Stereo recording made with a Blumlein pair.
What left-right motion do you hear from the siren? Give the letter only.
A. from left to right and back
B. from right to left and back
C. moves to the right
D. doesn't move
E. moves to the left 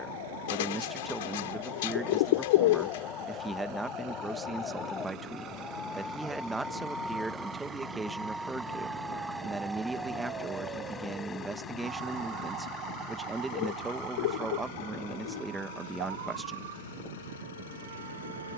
C.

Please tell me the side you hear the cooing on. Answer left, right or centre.
left.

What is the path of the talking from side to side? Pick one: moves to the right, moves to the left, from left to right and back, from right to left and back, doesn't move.
doesn't move.